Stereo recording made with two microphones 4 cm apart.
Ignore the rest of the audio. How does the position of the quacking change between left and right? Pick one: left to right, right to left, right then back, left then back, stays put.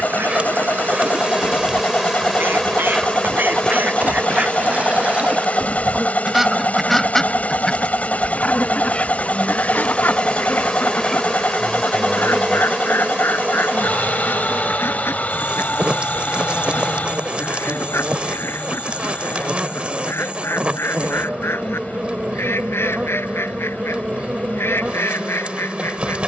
right to left.